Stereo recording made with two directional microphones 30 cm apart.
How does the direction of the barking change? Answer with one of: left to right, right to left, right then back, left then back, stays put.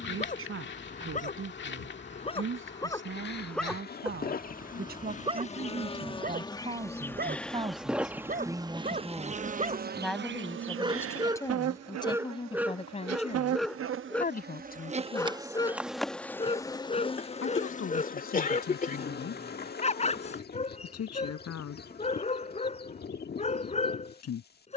right then back.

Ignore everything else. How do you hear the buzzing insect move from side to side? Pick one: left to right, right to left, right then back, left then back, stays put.
right then back.